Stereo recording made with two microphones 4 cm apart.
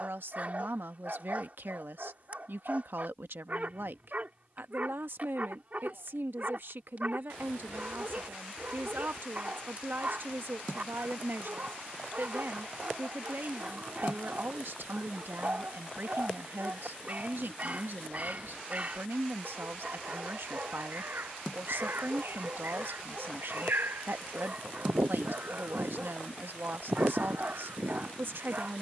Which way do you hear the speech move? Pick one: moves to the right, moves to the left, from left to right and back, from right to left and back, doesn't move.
doesn't move.